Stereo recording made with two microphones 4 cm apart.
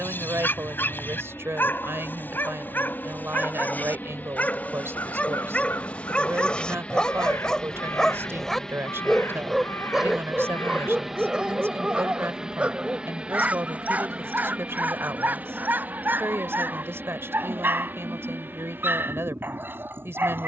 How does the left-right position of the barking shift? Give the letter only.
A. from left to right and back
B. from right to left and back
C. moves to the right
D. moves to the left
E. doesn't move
C.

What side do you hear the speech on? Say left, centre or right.
right.